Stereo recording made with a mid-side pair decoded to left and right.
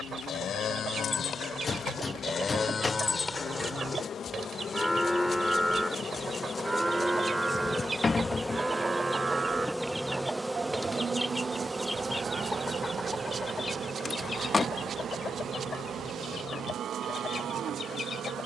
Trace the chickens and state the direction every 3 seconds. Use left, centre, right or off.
right, right, right, centre, left, left.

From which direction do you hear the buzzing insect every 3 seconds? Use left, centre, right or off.
left, left, left, centre, right, right.